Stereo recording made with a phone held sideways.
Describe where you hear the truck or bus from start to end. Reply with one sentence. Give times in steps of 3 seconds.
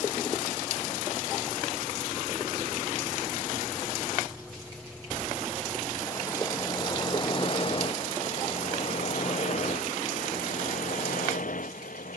In this clip you hear the truck or bus on the right from 0 s, in the centre from 3 s and on the left from 6 s.